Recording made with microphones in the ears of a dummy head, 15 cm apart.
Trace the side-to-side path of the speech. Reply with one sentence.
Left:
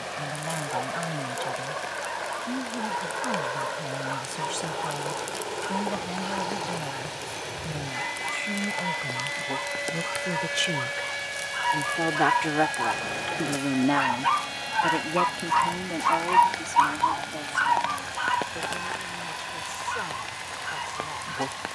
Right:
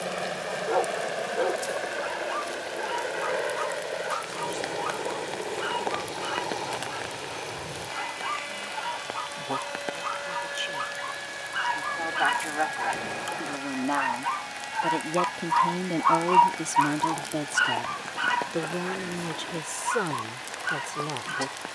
You can hear the speech travel towards the right.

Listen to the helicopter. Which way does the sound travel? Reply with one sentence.
In this clip you hear the helicopter move from right to left.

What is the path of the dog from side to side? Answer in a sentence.
You can hear the dog go left and come back.